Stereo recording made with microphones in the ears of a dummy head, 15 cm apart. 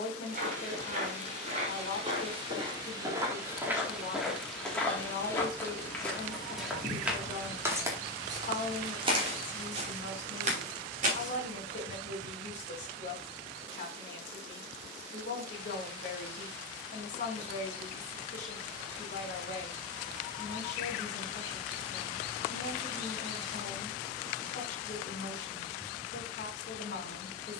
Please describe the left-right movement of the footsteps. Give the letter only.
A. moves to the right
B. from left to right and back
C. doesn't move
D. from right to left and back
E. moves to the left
D.